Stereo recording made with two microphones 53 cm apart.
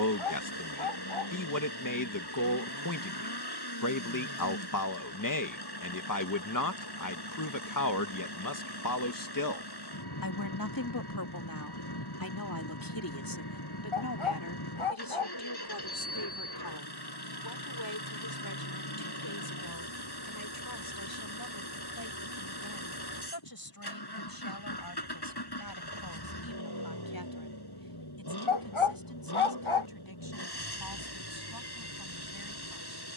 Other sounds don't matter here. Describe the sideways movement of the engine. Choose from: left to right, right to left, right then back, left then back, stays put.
stays put.